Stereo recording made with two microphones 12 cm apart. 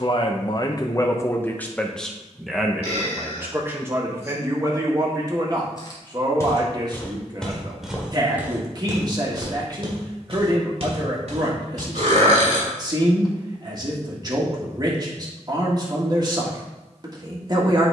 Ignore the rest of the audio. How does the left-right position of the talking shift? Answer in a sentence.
In this clip you hear the talking move from left to right.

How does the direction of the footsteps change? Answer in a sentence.
You can hear the footsteps go from the left side to the right.